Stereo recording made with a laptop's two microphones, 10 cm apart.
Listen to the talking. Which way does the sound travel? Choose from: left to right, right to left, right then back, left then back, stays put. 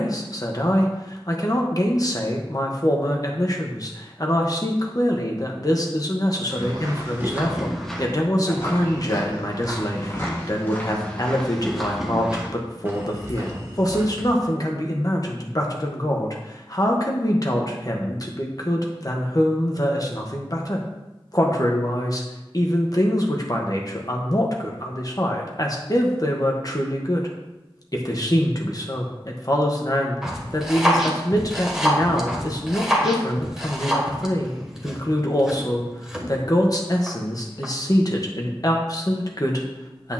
stays put.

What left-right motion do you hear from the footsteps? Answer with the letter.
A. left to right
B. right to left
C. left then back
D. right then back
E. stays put
C.